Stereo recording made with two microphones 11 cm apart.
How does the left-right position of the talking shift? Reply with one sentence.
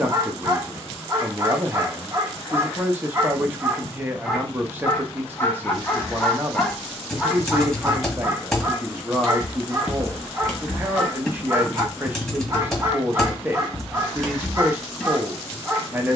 You can hear the talking stay put.